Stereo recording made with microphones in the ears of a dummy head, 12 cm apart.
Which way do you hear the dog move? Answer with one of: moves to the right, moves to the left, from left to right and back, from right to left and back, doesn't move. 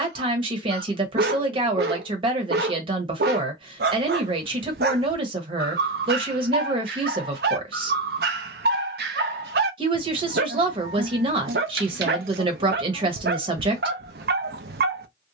doesn't move.